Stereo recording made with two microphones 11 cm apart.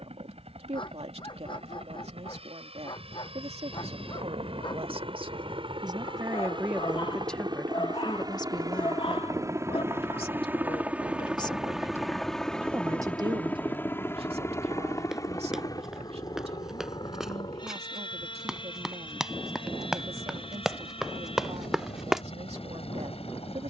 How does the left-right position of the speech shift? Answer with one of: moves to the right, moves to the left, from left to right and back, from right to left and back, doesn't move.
from right to left and back.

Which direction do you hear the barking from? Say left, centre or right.
left.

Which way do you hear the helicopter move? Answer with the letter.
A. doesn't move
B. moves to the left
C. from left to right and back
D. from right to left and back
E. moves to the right
B.